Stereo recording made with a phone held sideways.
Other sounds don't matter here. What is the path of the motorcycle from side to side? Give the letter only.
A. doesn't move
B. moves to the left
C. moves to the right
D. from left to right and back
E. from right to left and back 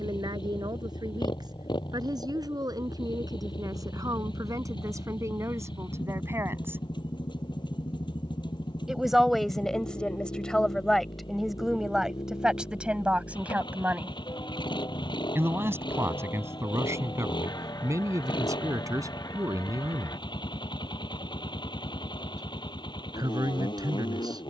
A.